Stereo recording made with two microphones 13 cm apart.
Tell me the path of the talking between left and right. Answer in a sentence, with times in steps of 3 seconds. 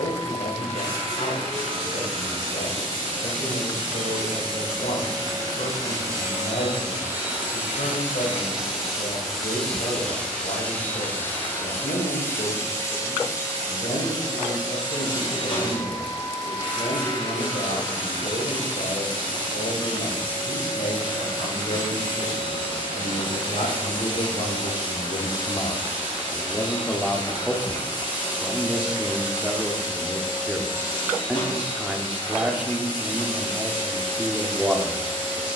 You can hear the talking on the left from 0 s and in the centre from 27 s.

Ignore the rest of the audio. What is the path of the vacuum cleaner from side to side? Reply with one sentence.
In this clip you hear the vacuum cleaner move to the left.